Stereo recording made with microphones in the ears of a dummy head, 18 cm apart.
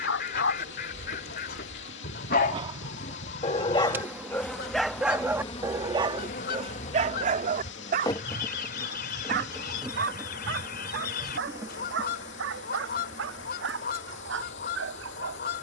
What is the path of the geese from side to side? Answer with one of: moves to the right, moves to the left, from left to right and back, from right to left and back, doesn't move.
doesn't move.